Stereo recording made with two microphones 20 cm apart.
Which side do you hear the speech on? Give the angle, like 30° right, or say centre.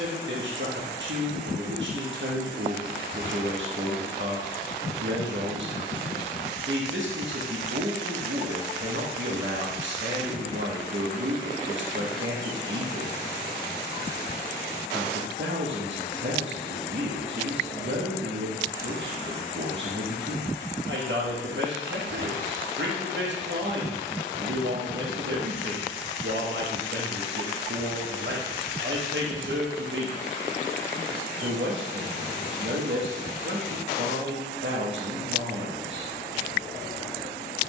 70° right.